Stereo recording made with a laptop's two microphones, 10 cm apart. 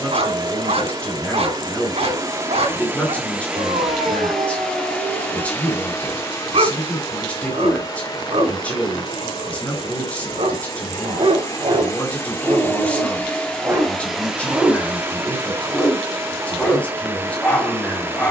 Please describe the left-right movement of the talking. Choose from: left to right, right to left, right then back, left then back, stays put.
stays put.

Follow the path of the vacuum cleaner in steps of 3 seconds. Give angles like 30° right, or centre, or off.
30° right, centre, 40° left, 40° left, 10° left, 20° right.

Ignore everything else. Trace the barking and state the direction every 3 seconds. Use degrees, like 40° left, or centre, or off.
70° right, 70° right, 70° right, 60° right, 30° right, 10° left.